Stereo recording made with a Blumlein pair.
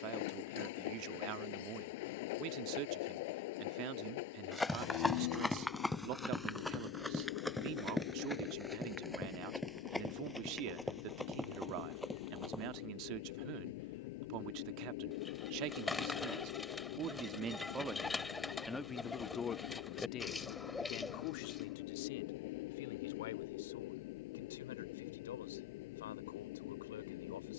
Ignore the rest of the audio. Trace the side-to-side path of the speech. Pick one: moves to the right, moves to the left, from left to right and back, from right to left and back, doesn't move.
moves to the left.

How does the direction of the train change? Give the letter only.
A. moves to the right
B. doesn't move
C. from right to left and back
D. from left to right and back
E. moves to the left
B.